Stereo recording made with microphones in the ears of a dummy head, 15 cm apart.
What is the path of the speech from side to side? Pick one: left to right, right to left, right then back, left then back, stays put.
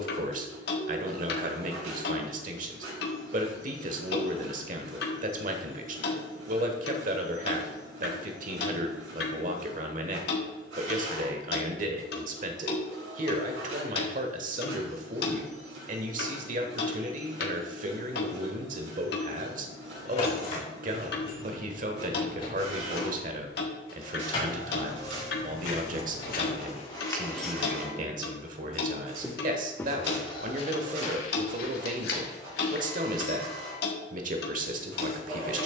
stays put.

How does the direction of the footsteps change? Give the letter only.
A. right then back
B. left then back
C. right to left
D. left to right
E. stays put
A.